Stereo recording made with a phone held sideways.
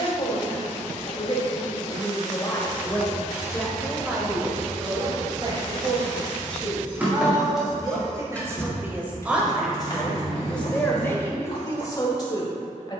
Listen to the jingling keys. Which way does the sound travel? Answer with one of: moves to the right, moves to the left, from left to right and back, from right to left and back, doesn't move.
moves to the left.